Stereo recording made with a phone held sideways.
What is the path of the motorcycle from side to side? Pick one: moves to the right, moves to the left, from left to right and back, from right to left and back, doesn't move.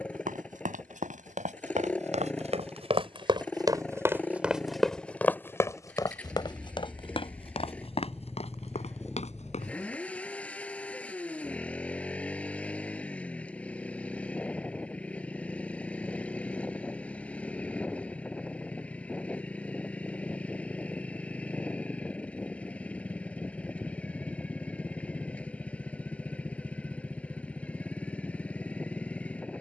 doesn't move.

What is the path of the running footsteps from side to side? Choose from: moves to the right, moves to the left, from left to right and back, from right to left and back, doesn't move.
moves to the left.